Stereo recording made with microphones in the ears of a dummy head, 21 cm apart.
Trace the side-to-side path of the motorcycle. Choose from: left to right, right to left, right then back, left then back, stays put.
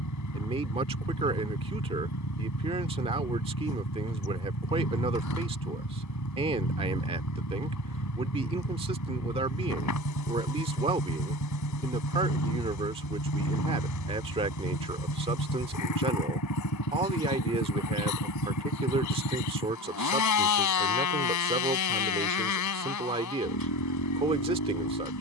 stays put.